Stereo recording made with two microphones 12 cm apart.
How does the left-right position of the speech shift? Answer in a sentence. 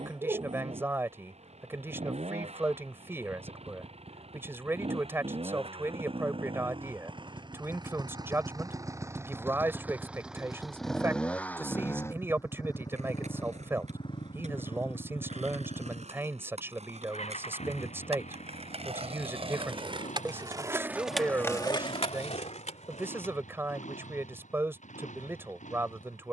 You can hear the speech stay put.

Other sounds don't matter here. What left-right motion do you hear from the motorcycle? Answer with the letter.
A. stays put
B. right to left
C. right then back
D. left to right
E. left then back
B.